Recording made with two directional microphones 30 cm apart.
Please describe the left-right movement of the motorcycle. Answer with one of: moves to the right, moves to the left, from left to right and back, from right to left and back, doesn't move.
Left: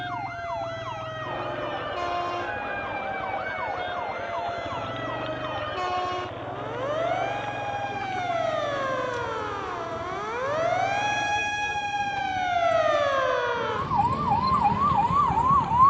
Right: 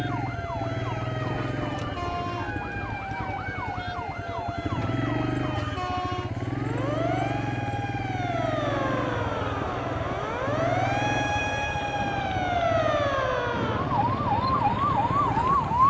doesn't move.